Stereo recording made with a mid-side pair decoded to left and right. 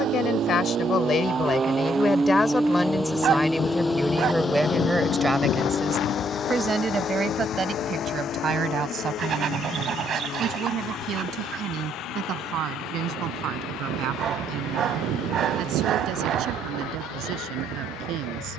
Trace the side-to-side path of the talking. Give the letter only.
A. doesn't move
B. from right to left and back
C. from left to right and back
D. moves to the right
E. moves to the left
D.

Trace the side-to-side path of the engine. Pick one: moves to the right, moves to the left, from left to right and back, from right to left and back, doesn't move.
moves to the left.